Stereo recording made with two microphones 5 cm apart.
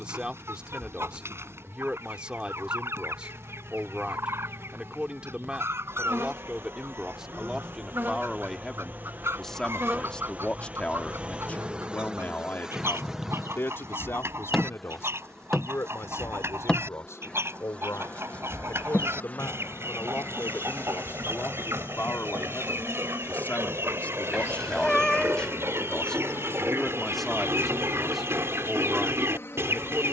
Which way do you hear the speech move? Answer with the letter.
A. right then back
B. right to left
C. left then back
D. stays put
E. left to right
C.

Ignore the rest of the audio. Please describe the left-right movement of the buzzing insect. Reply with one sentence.
You can hear the buzzing insect go from the right side to the left.